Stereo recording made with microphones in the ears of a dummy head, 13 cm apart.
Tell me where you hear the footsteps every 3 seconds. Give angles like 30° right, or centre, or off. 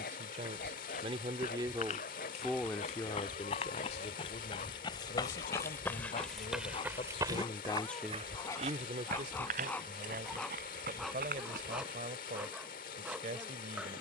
60° left, 40° left, 30° right, 80° right, off.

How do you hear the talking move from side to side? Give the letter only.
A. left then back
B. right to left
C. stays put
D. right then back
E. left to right
A.